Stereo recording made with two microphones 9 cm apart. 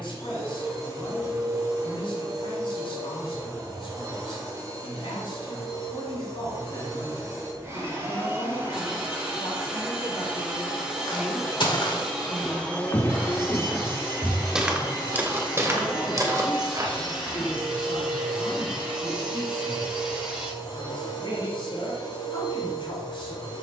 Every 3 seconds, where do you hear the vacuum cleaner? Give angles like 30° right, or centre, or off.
40° right, 40° right, 30° right, 10° right, 20° left, 50° left, 70° left, 70° left.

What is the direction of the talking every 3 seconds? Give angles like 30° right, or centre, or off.
80° left, 80° left, 70° left, 20° left, 20° left, 60° left, 70° left, 70° left.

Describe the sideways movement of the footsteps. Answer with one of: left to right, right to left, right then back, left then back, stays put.
left to right.